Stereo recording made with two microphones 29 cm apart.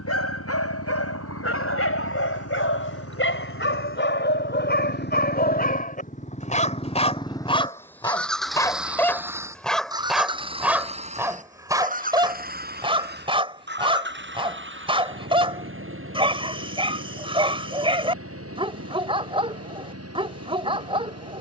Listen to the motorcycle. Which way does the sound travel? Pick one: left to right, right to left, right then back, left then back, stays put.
left to right.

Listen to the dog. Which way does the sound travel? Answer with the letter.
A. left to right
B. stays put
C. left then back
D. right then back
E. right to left
A.